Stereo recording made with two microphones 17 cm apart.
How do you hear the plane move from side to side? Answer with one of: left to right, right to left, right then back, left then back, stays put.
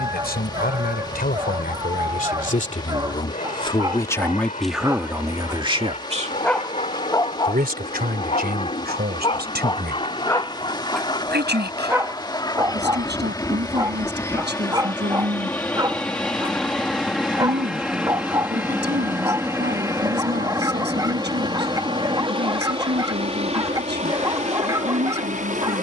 left to right.